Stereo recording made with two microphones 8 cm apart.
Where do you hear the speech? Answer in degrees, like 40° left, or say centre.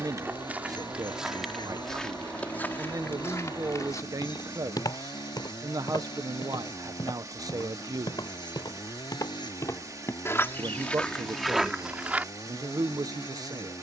50° right.